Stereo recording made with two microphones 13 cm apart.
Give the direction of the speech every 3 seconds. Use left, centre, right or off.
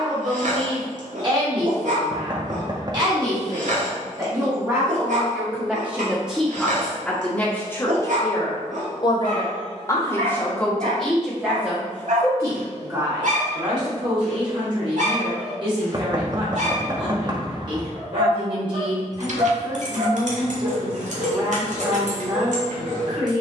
right, right, centre, centre, right, right, right, right.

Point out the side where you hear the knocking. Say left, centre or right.
right.